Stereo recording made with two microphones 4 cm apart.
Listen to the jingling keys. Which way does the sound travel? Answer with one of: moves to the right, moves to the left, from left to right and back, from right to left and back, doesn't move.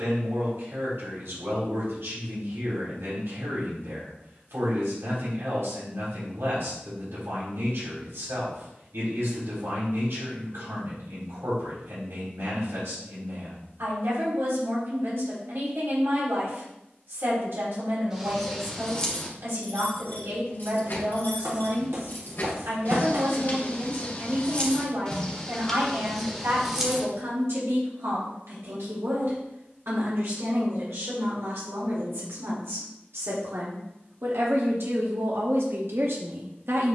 from right to left and back.